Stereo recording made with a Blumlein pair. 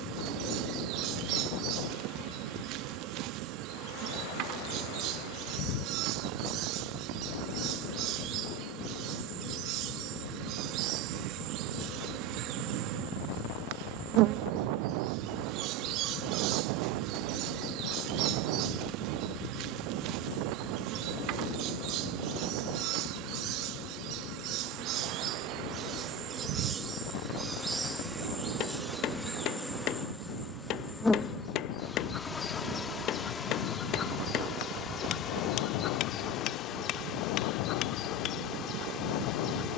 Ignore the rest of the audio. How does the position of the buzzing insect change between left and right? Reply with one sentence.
In this clip you hear the buzzing insect move from right to left.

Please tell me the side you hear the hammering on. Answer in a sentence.
In this clip you hear the hammering on the left.